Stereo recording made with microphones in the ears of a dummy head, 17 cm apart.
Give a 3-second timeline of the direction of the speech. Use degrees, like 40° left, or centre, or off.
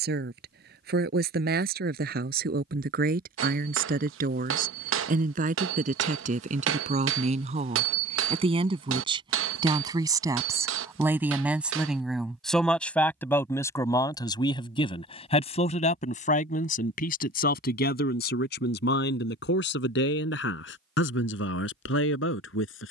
50° right, 50° right, 40° right, 10° right, 10° left, 40° left, 60° left, 70° left.